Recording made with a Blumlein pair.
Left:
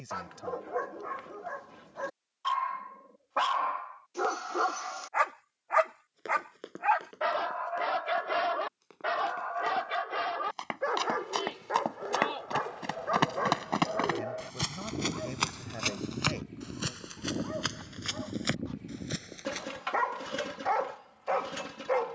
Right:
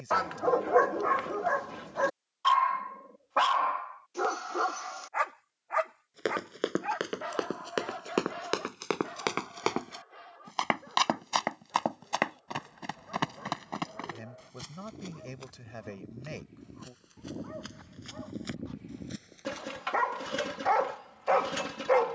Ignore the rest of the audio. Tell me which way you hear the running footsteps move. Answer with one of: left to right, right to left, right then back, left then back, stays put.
right to left.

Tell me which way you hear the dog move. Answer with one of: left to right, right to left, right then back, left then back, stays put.
left then back.